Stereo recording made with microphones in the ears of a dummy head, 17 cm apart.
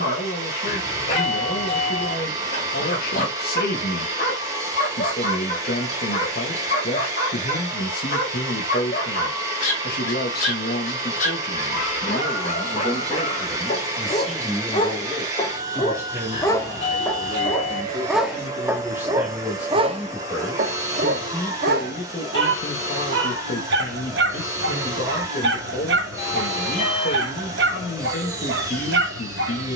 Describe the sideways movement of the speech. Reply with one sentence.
You can hear the speech go right and come back.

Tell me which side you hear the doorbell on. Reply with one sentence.
You can hear the doorbell on the left.